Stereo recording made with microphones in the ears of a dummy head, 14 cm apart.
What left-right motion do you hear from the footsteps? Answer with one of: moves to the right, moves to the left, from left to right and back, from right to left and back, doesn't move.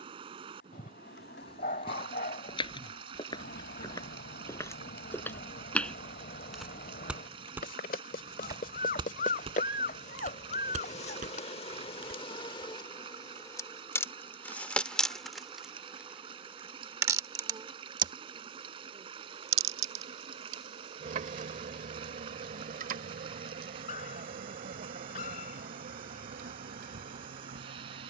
moves to the right.